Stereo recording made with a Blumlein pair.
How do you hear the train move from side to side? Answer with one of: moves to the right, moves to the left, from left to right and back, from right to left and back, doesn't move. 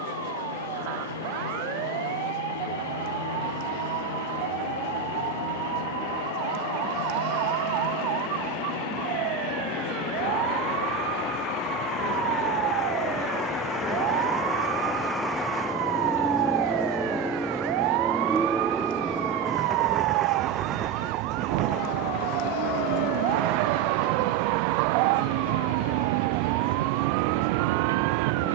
moves to the right.